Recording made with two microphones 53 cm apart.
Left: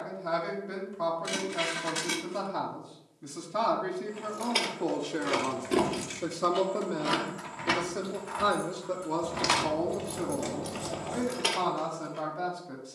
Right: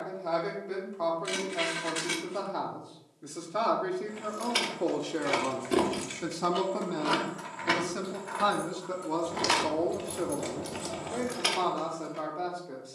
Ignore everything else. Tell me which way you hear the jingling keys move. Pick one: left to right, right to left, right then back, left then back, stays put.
left then back.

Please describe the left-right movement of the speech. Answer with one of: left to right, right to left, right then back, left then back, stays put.
right then back.